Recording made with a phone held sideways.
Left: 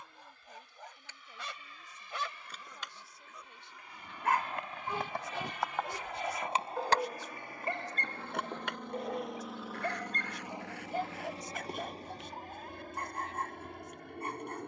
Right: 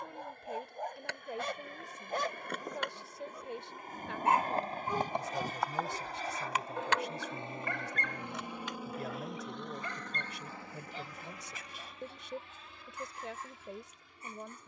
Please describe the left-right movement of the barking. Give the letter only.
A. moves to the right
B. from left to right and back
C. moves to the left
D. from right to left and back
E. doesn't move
C.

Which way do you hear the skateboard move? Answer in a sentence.
You can hear the skateboard go from the right side to the left.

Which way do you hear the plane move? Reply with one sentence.
You can hear the plane travel towards the left.